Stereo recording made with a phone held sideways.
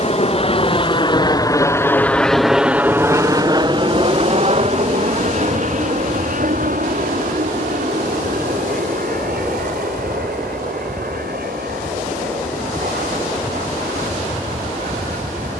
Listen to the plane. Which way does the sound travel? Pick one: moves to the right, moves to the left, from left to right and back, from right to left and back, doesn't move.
moves to the right.